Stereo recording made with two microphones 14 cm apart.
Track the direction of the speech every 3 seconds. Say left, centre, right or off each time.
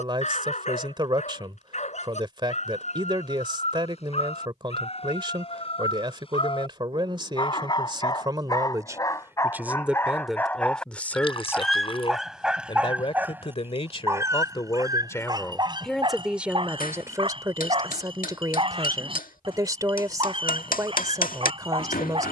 right, right, right, centre, left, centre, right, right.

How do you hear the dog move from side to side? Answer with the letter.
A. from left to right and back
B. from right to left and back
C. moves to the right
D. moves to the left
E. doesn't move
C.